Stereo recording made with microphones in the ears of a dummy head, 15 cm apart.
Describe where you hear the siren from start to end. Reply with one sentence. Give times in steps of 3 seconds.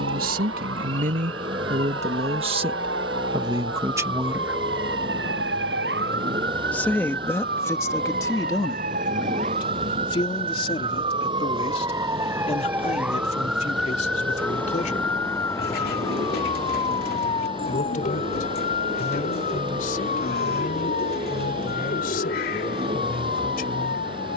You can hear the siren on the right from 0 s, in the centre from 12 s and on the left from 15 s.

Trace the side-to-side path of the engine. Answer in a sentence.
You can hear the engine stay put.